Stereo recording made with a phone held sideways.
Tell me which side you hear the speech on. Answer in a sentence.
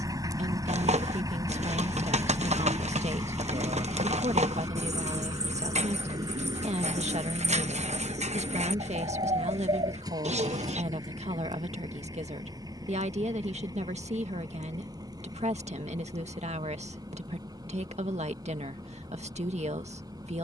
You can hear the speech on the right.